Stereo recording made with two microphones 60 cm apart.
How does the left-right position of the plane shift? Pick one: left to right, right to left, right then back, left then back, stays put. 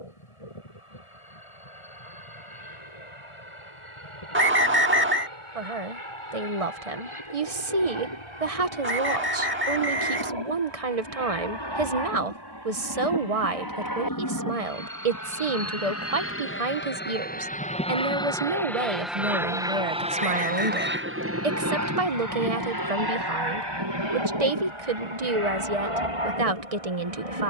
left to right.